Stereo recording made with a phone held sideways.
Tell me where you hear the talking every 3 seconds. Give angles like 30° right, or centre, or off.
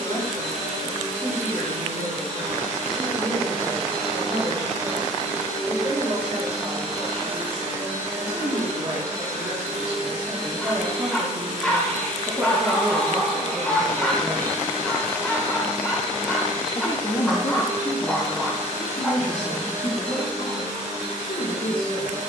60° right, 50° right, 40° right, 30° right, 10° right, 40° left, 60° left, 70° left.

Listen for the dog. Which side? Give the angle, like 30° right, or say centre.
10° left.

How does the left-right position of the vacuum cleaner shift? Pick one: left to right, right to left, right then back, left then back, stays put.
stays put.